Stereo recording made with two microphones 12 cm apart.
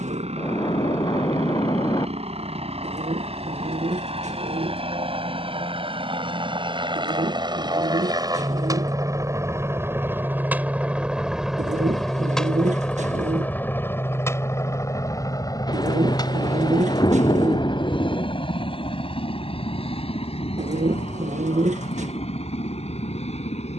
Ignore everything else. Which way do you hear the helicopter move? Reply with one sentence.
You can hear the helicopter travel towards the left.